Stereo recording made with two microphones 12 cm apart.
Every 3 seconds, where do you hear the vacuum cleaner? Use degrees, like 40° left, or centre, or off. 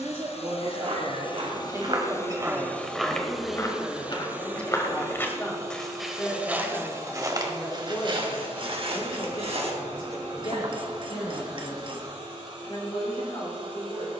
40° left, 10° right, 40° right, 50° right, 50° right.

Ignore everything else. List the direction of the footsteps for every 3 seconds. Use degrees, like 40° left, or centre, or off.
40° right, 20° left, 30° right, 60° right, off.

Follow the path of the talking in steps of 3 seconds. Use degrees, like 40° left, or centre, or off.
30° right, 10° left, 30° left, 40° left, 50° left.